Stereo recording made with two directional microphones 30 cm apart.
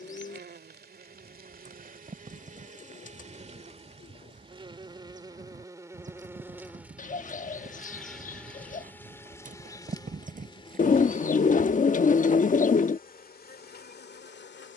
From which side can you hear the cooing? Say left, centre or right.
left.